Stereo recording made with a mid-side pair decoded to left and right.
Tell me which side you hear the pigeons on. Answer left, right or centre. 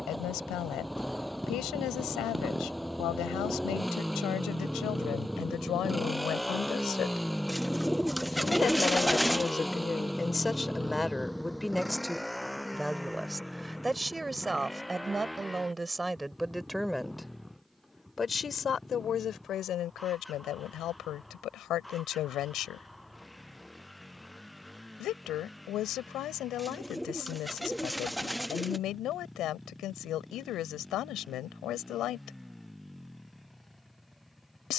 centre.